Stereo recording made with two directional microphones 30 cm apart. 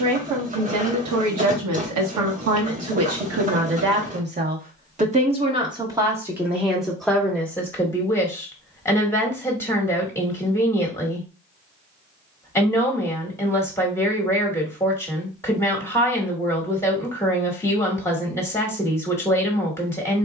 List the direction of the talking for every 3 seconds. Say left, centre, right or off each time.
right, right, centre, centre, centre, centre, centre.